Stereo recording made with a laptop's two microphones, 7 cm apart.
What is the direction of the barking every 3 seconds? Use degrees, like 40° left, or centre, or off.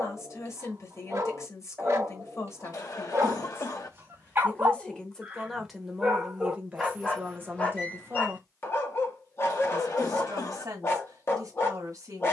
40° right, 30° right, 20° left, 40° left.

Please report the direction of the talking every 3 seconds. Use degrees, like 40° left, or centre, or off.
50° left, 10° left, 20° right, 50° right.